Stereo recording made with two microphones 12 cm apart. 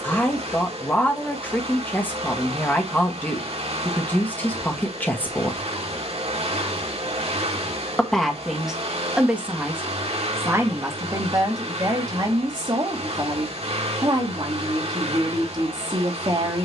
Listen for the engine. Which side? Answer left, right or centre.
right.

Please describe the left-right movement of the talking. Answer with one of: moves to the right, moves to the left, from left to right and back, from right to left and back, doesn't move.
moves to the right.